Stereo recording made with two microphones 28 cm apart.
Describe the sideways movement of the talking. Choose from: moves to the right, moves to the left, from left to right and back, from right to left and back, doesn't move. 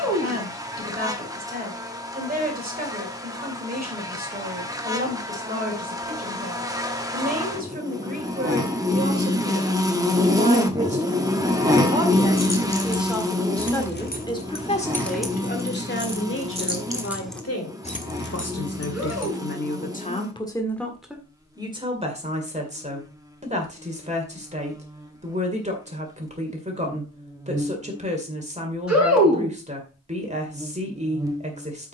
from right to left and back.